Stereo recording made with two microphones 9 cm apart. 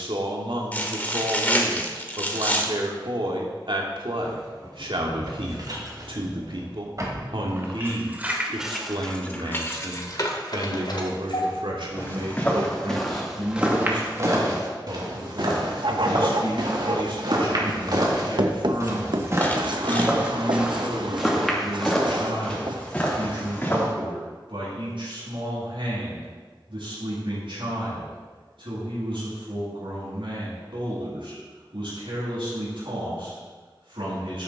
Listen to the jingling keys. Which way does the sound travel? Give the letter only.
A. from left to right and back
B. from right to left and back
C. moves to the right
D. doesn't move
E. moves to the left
E.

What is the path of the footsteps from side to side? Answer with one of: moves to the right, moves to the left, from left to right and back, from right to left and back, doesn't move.
from left to right and back.